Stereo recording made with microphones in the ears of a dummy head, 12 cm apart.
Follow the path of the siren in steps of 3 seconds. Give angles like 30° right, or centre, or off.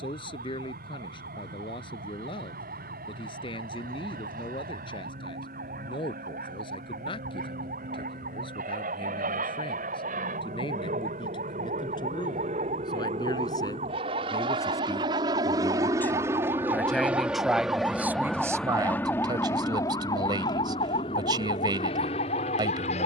70° right, 70° right, 70° right, 60° right, 50° right, 30° right, 20° left, 50° left.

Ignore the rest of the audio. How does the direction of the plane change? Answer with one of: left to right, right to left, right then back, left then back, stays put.
right to left.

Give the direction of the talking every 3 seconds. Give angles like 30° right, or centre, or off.
40° left, 40° left, 40° left, 40° left, 30° left, 10° left, 30° right, 30° right.